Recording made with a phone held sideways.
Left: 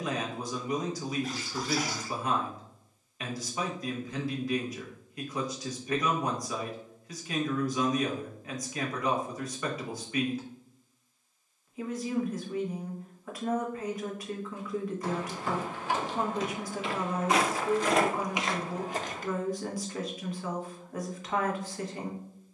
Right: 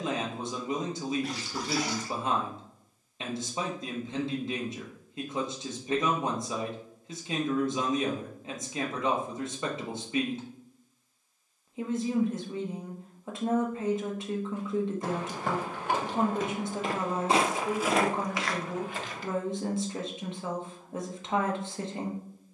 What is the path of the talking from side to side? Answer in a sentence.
You can hear the talking stay put.